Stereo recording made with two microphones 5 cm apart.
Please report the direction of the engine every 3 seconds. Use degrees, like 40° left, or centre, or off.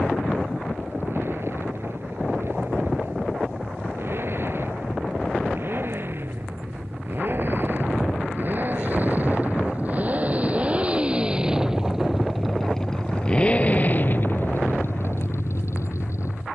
60° right, 50° right, 50° right, 30° right, 30° left, 70° left.